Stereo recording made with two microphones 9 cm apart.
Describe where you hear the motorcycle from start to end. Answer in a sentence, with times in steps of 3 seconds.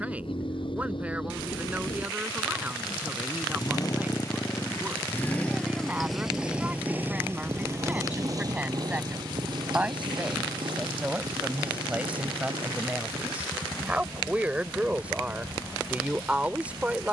In this clip you hear the motorcycle on the left from 0 s and on the right from 6 s.